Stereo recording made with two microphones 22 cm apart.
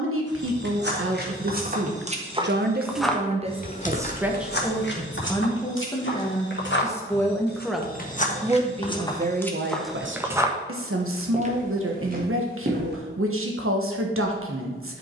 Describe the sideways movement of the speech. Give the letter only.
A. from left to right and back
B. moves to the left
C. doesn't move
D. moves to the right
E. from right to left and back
E.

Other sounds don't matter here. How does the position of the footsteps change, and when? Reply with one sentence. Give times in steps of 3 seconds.
You can hear the footsteps on the right from 0 s, on the left from 3 s, in the centre from 9 s and on the right from 12 s.